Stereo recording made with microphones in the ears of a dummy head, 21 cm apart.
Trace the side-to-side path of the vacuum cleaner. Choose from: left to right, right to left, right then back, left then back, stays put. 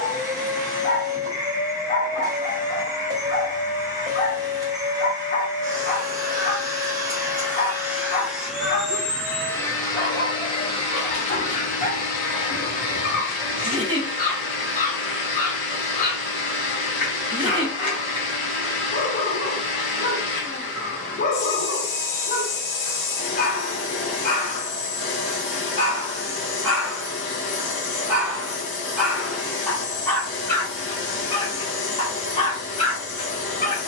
right to left.